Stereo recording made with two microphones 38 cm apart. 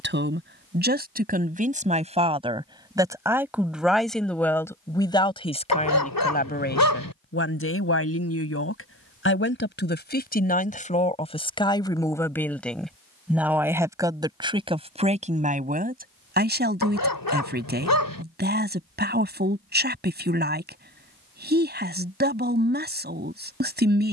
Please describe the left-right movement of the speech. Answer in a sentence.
In this clip you hear the speech go left and come back.